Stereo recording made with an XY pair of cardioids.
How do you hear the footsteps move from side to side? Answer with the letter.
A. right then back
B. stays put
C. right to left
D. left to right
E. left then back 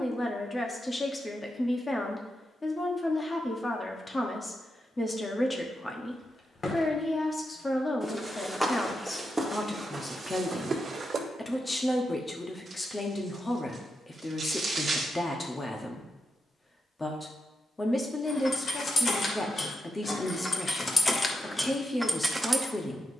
D.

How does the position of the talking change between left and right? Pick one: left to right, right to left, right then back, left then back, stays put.
stays put.